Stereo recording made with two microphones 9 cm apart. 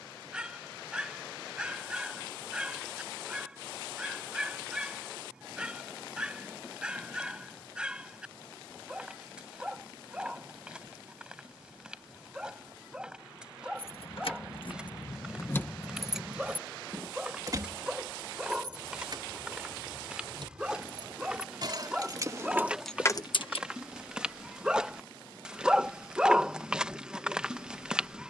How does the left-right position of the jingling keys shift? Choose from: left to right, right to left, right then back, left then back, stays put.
right then back.